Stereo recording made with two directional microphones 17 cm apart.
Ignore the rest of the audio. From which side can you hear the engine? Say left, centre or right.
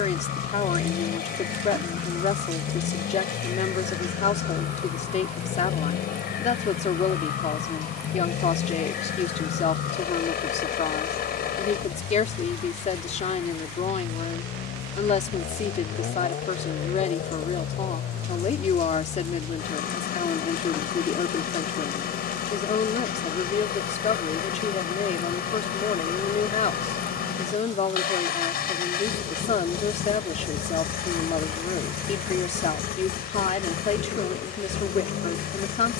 left.